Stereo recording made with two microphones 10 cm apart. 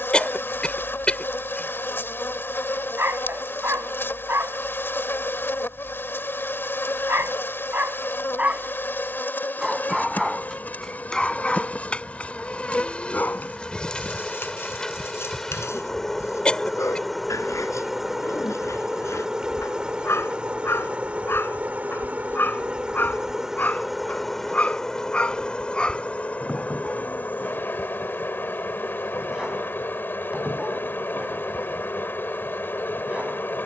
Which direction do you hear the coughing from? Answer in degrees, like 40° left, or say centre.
10° left.